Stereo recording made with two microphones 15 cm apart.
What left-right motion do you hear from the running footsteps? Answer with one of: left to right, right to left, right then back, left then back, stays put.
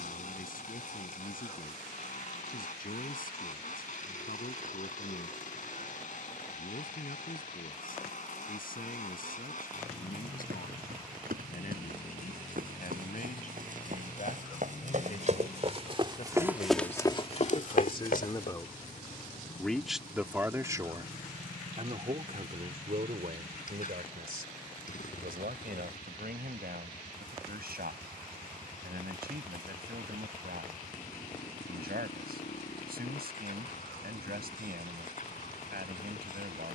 right to left.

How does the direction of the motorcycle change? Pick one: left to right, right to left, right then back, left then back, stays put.
stays put.